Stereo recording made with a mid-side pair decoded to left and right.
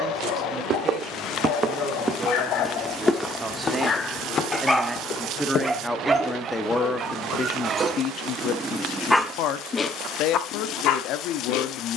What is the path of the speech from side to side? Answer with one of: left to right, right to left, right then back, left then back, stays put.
right to left.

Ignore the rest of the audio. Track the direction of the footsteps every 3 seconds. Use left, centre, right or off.
right, left, left, off.